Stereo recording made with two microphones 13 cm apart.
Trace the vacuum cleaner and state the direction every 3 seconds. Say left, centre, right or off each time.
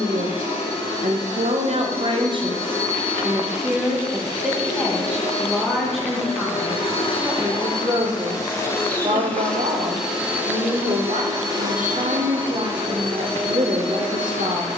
left, left, left, centre, right.